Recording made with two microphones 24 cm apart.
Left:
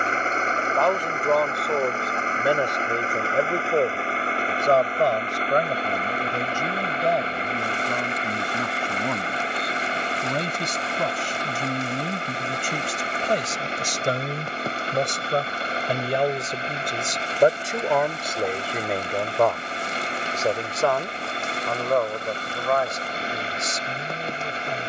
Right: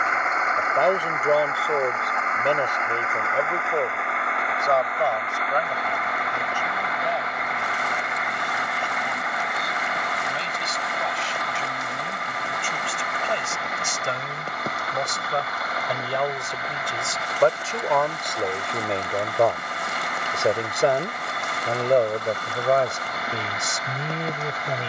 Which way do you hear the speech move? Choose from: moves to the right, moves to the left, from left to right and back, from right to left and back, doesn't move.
from right to left and back.